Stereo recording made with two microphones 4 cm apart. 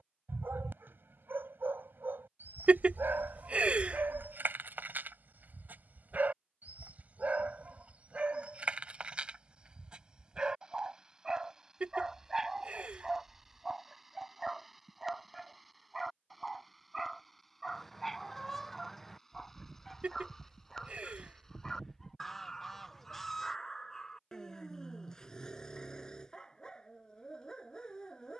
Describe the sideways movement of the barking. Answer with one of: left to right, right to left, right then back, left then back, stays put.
right to left.